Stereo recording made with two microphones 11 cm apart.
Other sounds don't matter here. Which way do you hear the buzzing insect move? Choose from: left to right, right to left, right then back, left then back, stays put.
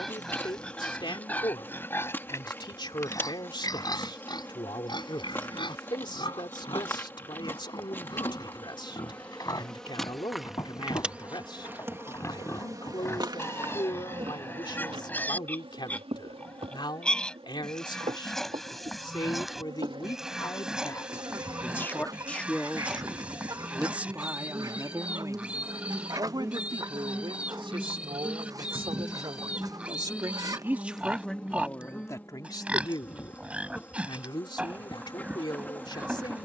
right then back.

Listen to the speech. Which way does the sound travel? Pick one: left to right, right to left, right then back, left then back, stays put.
right then back.